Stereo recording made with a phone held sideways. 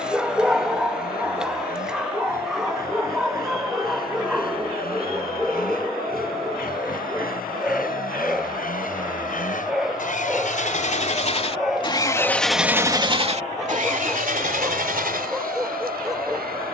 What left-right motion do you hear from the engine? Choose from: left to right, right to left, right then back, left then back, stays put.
left to right.